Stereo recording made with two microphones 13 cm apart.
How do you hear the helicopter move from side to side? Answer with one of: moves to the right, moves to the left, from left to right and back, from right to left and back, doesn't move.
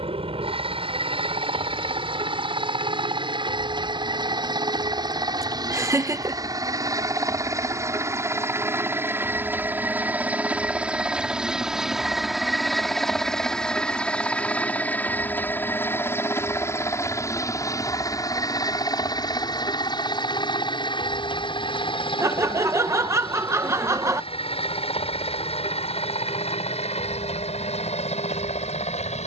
moves to the left.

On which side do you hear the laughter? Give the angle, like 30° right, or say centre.
20° right.